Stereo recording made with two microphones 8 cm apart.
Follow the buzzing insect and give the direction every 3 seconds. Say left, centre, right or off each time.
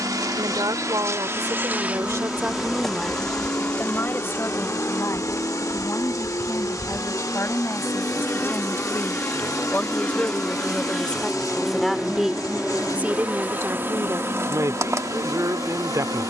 right, left, left, centre, right, right.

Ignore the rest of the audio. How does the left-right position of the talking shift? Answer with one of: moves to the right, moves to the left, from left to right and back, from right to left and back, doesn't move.
from right to left and back.